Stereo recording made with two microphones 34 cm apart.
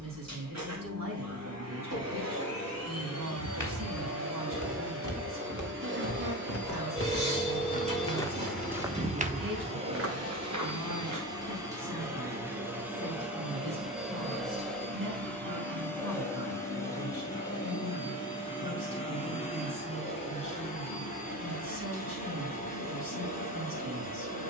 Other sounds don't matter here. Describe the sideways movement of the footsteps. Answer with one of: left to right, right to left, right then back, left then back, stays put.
left to right.